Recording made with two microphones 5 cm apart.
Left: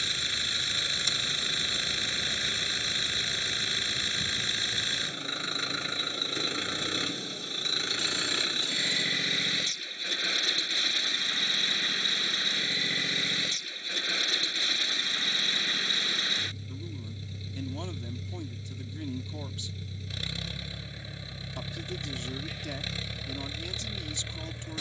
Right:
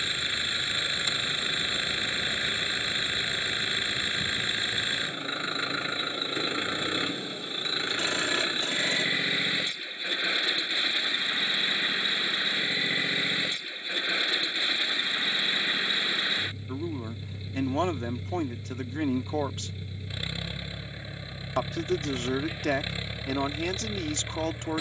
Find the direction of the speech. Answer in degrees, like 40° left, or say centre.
70° right.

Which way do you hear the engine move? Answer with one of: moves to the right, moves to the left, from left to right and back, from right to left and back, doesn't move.
doesn't move.